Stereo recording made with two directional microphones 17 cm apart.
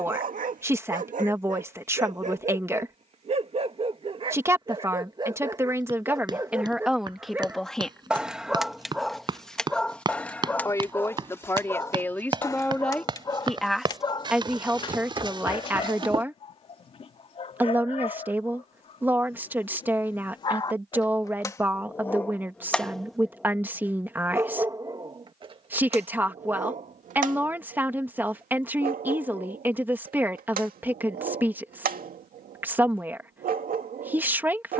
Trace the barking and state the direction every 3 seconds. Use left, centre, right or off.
right, right, centre, centre, left, left, left, centre, right, right, right, right.